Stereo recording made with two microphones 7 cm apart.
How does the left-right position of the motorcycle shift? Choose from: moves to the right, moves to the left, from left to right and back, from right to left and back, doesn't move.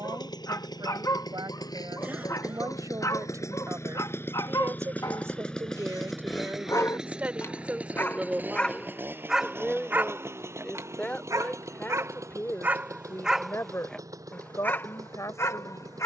moves to the right.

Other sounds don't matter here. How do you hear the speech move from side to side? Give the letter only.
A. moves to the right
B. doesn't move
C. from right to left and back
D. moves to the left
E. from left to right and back
D.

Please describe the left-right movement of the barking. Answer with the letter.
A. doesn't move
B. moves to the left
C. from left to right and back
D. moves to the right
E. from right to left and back
C.